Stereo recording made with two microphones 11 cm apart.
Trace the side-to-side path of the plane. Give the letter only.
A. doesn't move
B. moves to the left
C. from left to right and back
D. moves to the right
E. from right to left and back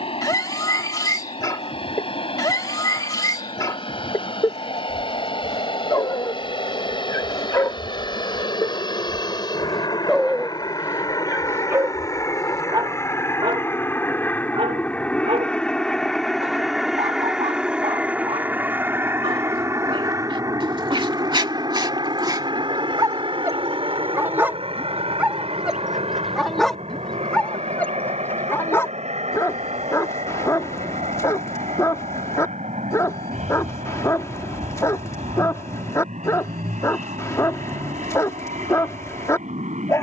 D.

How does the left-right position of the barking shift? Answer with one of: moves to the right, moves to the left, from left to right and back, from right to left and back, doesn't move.
from left to right and back.